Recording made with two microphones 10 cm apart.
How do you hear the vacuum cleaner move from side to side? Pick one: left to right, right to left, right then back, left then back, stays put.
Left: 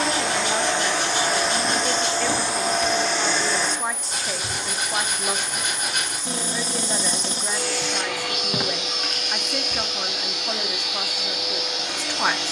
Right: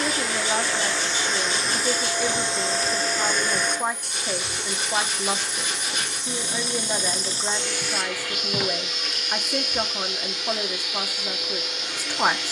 stays put.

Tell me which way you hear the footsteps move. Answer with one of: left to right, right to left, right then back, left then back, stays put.
right then back.